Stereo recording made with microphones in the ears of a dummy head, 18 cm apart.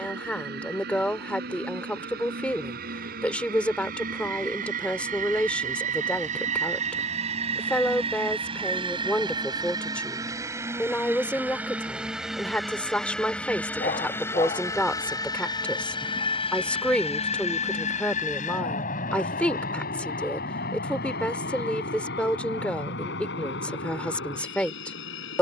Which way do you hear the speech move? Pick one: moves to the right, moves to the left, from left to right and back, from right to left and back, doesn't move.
doesn't move.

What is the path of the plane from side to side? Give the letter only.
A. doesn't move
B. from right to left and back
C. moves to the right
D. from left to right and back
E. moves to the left
E.